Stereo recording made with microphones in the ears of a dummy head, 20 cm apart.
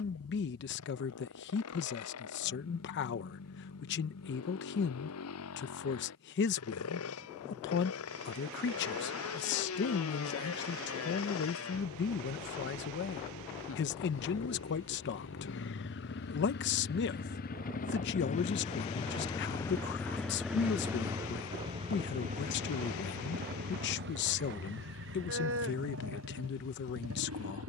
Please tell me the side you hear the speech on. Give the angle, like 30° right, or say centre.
50° left.